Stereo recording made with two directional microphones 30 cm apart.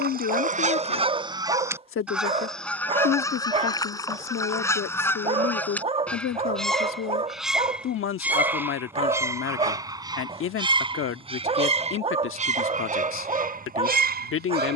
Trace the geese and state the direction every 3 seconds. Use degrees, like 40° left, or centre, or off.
10° right, 10° left, centre, 20° right, 30° right.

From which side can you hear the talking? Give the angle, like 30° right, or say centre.
50° left.